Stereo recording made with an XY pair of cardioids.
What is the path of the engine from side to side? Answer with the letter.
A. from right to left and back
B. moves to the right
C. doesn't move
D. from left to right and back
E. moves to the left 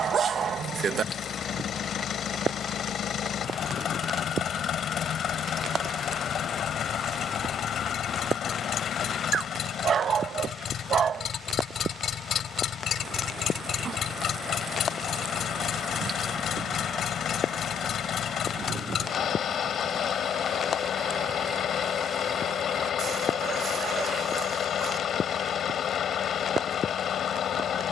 C.